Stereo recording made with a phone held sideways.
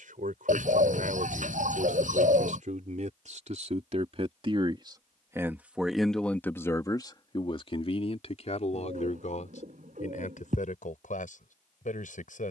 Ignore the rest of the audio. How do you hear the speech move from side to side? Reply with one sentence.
You can hear the speech move to the left.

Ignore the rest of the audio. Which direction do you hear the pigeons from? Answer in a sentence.
You can hear the pigeons on the right.